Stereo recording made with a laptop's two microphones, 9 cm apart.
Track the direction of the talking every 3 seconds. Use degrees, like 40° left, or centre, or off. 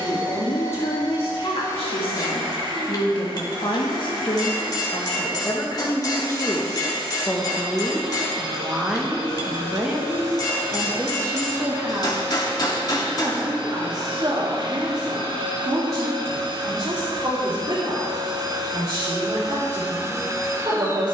70° left, 50° left, 20° left, 20° right, 40° right, 50° right, 60° right.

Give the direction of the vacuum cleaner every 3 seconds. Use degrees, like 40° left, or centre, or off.
70° right, 70° right, 70° right, 70° right, 70° right, 60° right, 40° right.